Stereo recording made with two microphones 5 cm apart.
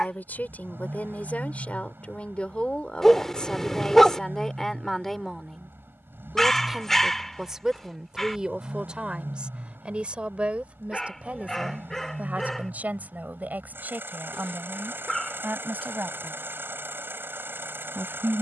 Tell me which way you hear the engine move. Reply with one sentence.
You can hear the engine stay in one place.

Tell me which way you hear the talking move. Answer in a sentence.
In this clip you hear the talking move from left to right.